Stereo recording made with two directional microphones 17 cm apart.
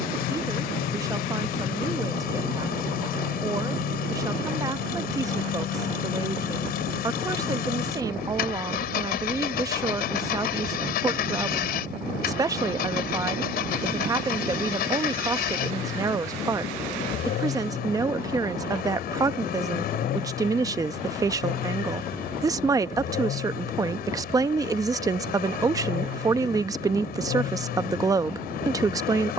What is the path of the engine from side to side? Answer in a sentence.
You can hear the engine stay put.